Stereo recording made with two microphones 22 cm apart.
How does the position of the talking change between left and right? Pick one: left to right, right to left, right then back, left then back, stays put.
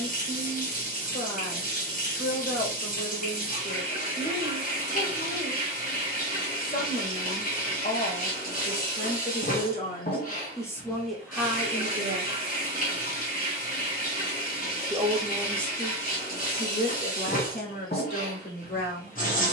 right then back.